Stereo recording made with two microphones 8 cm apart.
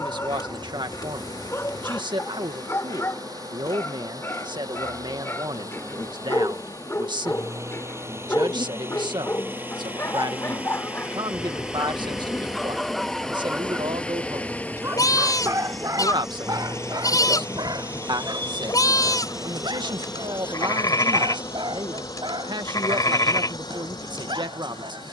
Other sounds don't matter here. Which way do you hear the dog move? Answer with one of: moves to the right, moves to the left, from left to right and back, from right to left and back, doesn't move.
moves to the right.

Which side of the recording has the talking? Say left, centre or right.
right.